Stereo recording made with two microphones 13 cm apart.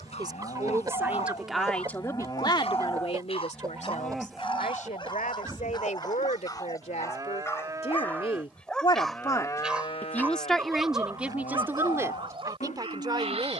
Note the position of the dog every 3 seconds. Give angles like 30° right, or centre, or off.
50° left, 40° left, 20° left, 20° right, 50° right.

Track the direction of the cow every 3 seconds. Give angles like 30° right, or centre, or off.
40° left, centre, 20° right, 50° left, 70° left.